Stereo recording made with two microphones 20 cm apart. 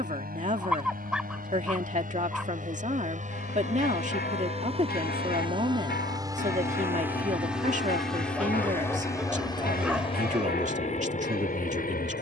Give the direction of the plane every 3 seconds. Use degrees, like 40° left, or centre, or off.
50° right, 30° right, centre, 30° left.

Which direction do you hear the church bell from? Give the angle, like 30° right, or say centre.
50° left.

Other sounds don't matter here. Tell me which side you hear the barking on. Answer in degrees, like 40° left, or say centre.
centre.